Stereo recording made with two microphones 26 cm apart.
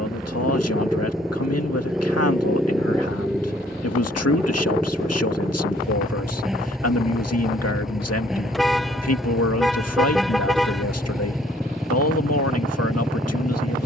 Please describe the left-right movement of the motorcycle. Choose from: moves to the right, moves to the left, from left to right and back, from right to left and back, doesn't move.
doesn't move.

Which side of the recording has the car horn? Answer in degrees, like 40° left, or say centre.
centre.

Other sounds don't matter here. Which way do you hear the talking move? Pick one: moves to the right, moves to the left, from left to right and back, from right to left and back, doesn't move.
doesn't move.